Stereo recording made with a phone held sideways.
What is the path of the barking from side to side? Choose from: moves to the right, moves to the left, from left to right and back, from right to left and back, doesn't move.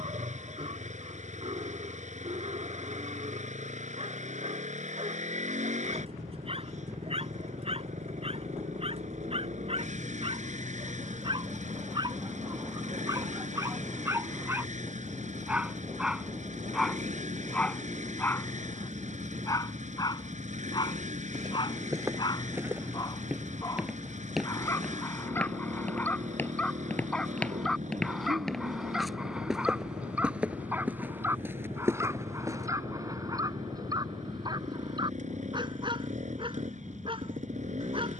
from right to left and back.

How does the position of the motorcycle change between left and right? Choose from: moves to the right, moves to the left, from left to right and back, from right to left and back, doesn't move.
doesn't move.